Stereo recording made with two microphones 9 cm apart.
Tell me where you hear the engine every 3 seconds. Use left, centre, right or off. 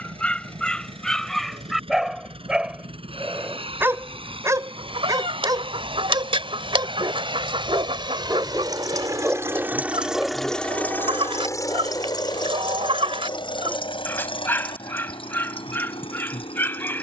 right, right, right, centre, left, left.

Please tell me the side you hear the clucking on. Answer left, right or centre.
right.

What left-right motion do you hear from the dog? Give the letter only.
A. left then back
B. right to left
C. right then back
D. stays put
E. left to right
C.